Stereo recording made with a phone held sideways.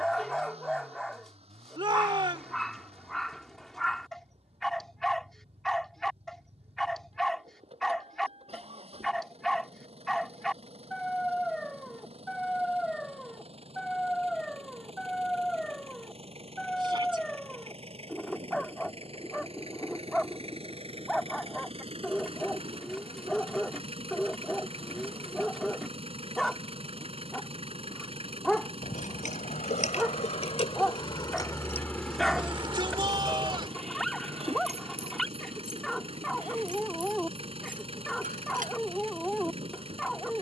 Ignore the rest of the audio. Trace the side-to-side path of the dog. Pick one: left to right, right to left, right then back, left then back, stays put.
stays put.